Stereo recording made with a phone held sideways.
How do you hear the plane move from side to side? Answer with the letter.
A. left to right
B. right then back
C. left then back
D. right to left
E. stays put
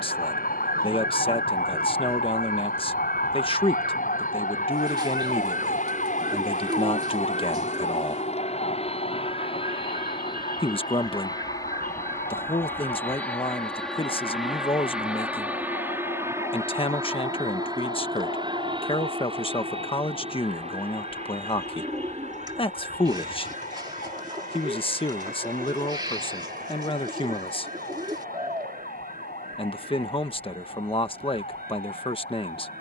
A.